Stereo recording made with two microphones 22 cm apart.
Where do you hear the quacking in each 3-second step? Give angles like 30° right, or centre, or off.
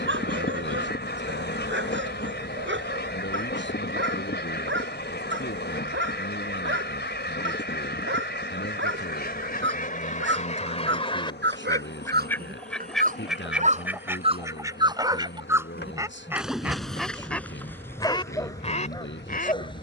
50° left, 50° left, 50° left, 30° left, centre, 10° right, 30° left.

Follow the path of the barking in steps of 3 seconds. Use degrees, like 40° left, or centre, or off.
60° right, 60° right, 60° right, 60° right, 40° right, centre, 20° left.